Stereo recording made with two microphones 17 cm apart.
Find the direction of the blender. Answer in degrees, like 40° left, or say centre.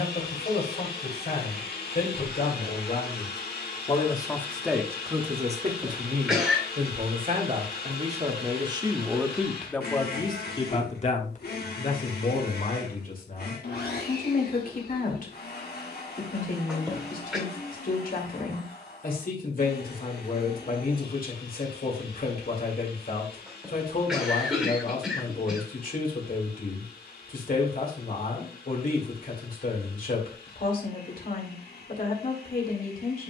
70° left.